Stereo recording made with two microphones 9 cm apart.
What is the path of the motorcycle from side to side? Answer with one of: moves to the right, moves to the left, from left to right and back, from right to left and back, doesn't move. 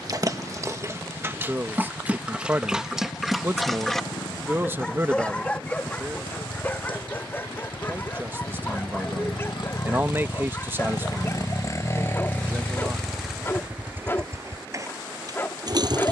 moves to the right.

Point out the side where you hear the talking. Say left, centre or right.
right.